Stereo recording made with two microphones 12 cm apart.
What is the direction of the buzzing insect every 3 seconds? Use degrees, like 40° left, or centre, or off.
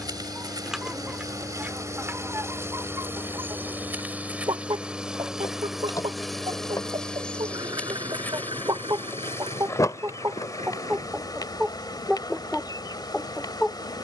30° right, 10° right, 10° left, 30° left, 30° left.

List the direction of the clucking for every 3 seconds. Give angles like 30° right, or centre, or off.
10° right, 40° right, 40° right, 20° right, centre.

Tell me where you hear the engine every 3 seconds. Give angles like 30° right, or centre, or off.
40° left, 10° left, 30° right, 60° right, 70° right.